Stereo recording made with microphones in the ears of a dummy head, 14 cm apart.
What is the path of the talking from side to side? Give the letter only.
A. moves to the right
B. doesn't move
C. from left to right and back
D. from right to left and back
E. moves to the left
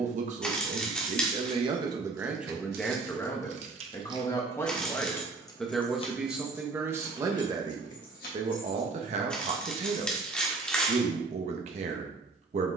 D.